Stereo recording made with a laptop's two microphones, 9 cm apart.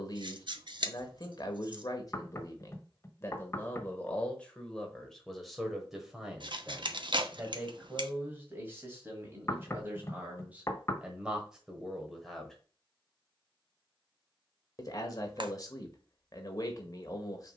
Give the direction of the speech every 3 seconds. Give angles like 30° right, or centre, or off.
40° left, 10° left, 20° right, 20° right, 10° left, 40° left.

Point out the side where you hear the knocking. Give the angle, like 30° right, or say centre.
30° left.